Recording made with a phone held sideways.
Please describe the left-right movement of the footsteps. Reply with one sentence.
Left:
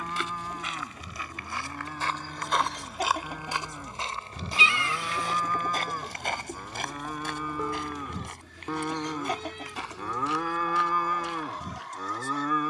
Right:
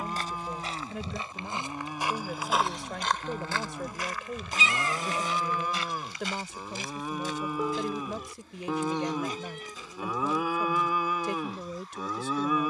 You can hear the footsteps move to the left.